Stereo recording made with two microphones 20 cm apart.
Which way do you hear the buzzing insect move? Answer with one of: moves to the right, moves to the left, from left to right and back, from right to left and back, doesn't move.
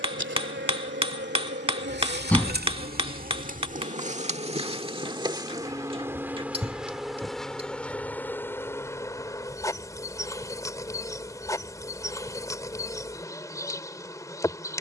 moves to the left.